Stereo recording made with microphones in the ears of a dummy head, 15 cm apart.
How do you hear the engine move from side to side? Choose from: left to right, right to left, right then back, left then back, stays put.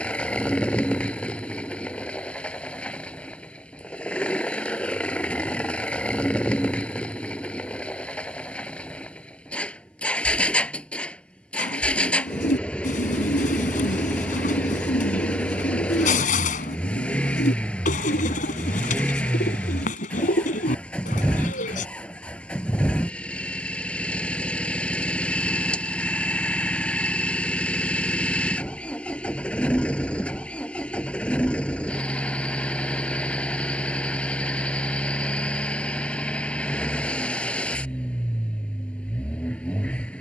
stays put.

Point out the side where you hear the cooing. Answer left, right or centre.
left.